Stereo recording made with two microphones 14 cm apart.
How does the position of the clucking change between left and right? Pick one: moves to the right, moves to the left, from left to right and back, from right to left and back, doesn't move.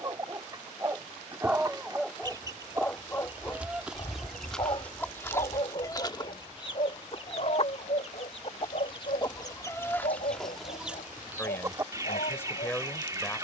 from right to left and back.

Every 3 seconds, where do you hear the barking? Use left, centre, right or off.
centre, left, left, left, left.